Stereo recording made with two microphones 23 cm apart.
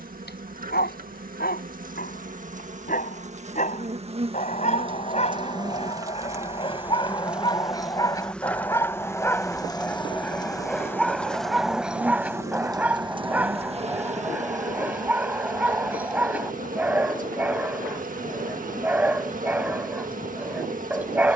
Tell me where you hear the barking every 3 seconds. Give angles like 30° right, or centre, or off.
40° left, 30° left, 20° left, centre, 10° right, 10° right, 10° right.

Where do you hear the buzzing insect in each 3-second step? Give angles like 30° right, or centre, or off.
40° right, 30° right, centre, 10° left, 30° right, 40° right, 40° right.